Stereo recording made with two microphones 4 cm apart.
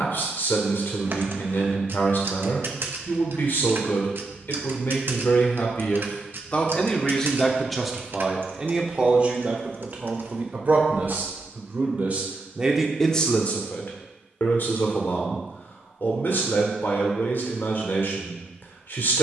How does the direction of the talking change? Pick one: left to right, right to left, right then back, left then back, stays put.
right then back.